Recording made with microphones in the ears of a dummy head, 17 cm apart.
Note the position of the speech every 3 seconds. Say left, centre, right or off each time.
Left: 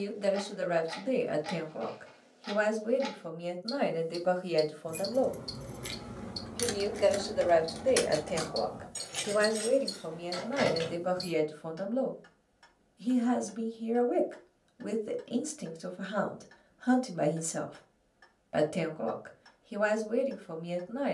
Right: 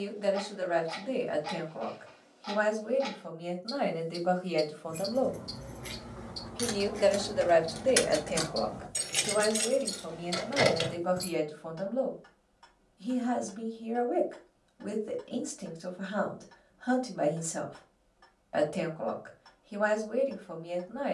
left, left, centre, left, left, left, left.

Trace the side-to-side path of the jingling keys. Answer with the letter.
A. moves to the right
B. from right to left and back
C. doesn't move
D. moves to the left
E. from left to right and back
A.